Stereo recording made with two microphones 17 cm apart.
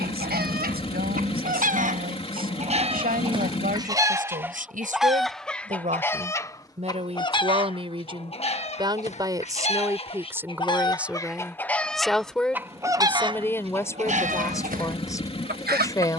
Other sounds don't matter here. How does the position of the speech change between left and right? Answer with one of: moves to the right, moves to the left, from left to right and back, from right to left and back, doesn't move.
moves to the left.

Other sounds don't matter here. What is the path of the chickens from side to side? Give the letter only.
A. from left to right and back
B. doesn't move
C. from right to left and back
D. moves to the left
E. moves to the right
C.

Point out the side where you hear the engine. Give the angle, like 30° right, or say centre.
30° left.